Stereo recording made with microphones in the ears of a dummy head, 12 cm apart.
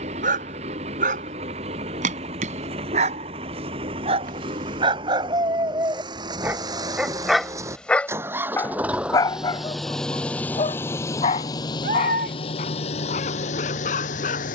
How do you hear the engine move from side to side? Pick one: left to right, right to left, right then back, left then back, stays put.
right to left.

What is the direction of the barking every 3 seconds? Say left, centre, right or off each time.
right, right, centre, left, left.